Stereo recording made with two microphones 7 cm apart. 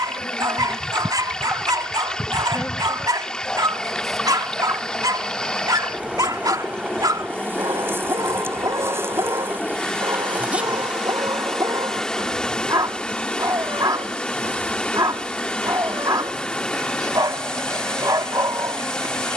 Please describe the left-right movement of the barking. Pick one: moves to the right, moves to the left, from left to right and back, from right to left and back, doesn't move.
doesn't move.